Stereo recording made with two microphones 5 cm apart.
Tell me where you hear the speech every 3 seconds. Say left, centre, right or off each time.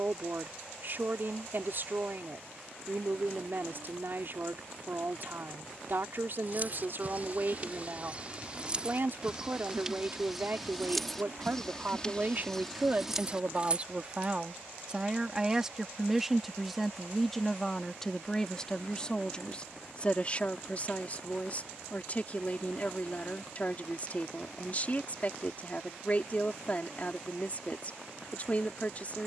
right, right, right, right, right, centre, left, left, left, left.